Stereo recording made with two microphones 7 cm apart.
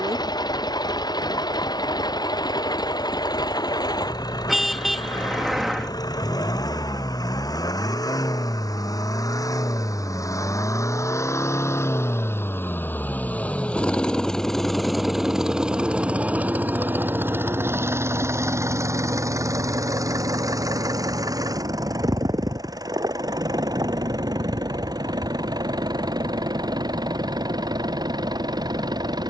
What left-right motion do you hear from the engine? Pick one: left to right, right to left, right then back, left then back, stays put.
left to right.